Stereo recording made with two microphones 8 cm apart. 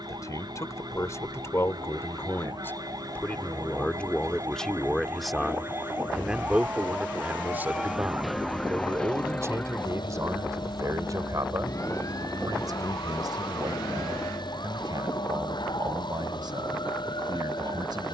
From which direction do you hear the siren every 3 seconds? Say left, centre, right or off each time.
right, right, centre, left, left, left.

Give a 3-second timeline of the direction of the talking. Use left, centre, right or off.
left, centre, right, right, right, right.